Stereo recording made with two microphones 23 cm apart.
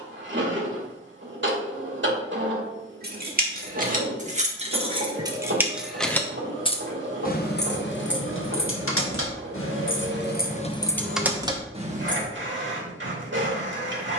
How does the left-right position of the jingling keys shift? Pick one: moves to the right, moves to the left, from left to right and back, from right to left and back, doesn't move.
from right to left and back.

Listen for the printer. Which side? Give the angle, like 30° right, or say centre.
60° right.